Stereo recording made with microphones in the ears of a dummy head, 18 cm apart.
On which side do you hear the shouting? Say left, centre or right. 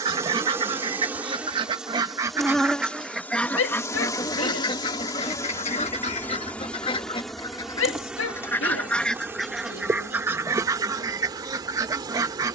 left.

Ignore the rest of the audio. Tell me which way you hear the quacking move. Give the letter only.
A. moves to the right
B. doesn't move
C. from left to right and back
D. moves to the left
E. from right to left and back
E.